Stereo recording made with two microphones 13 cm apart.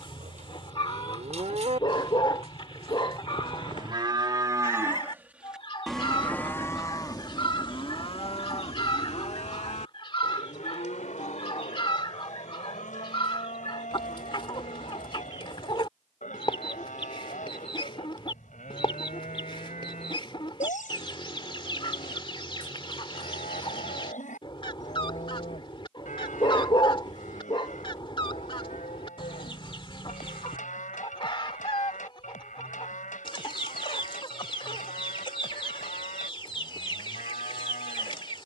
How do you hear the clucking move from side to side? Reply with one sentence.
In this clip you hear the clucking stay in one place.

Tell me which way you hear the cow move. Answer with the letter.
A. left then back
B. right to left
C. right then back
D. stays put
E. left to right
B.